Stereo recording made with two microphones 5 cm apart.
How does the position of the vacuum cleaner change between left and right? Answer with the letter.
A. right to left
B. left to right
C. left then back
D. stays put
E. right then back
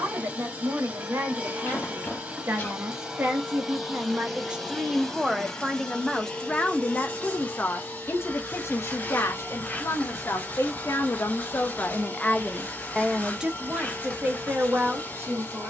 A.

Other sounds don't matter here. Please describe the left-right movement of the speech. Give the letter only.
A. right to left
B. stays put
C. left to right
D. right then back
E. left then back
E.